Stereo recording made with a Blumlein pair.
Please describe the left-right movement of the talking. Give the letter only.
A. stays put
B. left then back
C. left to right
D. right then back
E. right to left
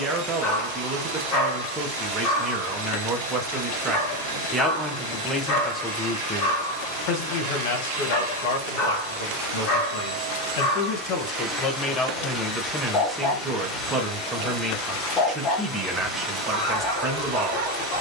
B.